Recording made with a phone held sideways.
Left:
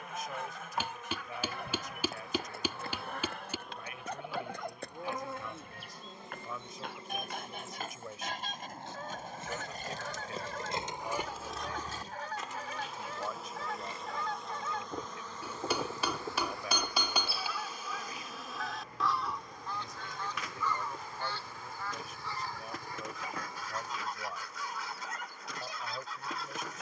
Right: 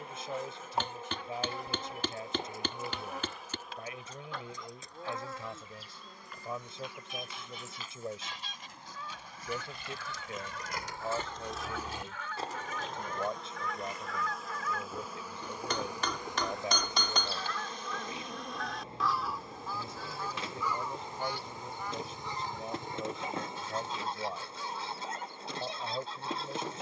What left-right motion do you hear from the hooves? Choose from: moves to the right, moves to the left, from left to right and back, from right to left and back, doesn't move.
moves to the right.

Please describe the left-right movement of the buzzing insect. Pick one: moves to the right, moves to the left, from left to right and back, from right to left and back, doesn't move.
from right to left and back.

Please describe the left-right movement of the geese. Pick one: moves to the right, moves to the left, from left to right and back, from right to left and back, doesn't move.
moves to the right.